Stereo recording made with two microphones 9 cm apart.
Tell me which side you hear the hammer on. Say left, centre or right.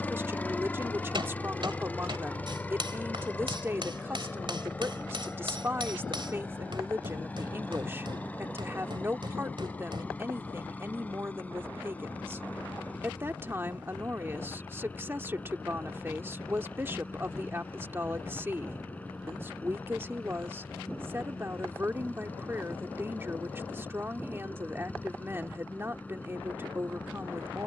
right.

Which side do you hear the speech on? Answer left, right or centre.
right.